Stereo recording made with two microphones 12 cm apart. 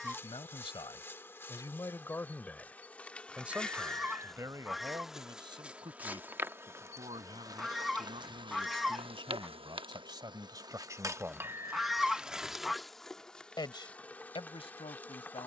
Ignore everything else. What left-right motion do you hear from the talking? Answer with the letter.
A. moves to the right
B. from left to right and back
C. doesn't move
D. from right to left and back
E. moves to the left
B.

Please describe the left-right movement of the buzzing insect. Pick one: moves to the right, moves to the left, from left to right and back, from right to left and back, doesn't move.
from left to right and back.